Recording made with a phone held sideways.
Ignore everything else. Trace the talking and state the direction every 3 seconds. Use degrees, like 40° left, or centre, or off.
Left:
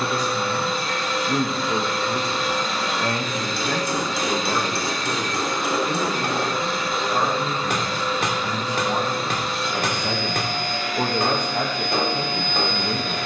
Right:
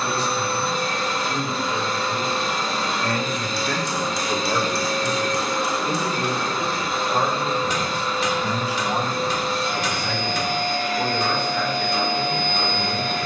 40° left, 10° left, 20° right, 30° left, 40° left.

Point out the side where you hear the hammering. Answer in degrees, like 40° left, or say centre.
60° left.